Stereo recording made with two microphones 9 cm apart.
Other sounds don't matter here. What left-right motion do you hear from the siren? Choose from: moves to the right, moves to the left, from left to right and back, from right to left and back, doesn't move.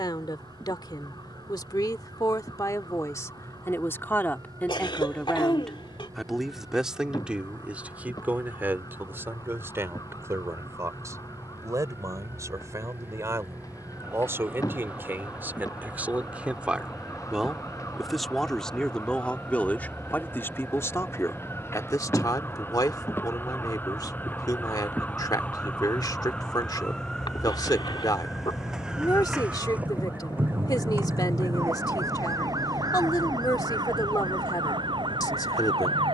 moves to the right.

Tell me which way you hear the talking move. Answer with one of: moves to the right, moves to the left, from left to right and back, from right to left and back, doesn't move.
from left to right and back.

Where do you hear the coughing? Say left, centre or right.
left.